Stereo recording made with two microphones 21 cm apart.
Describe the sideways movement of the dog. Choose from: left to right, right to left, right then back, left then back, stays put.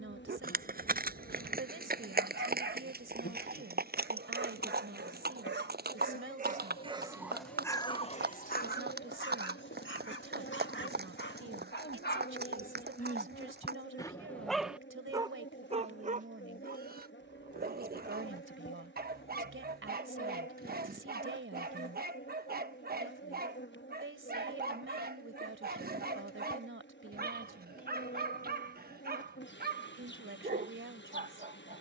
left then back.